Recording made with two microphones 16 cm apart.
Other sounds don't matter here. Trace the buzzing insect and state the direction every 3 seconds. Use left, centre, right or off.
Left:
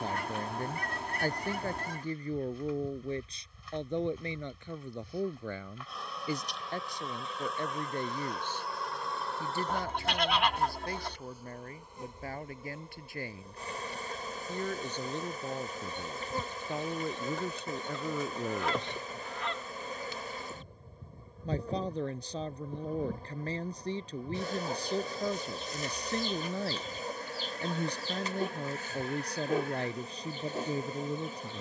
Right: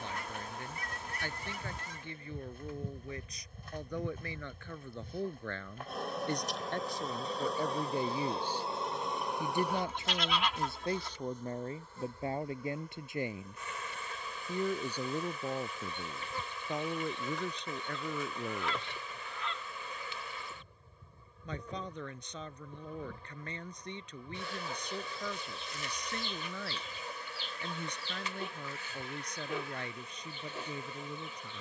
right, right, right, centre, left, left, left, left, left, left, left.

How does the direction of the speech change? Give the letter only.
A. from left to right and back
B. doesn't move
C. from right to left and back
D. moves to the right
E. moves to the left
A.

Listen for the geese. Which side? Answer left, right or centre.
left.